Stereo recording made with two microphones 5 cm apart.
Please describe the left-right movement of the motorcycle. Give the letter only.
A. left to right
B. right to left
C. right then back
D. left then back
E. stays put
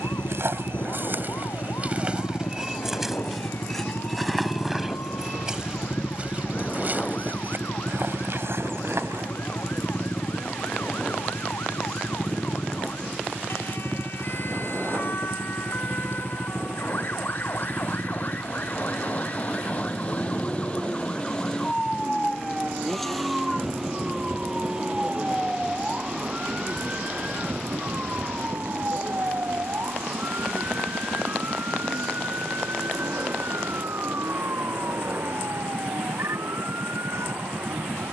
A.